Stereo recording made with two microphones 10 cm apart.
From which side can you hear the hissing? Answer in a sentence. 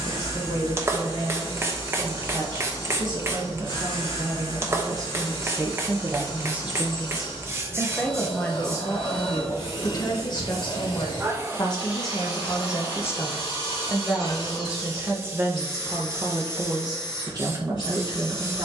You can hear the hissing on the right.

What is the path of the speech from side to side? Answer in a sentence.
You can hear the speech go left and come back.